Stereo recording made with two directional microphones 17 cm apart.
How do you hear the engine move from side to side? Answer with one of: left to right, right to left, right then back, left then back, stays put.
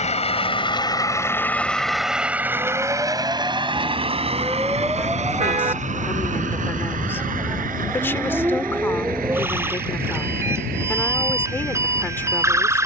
left to right.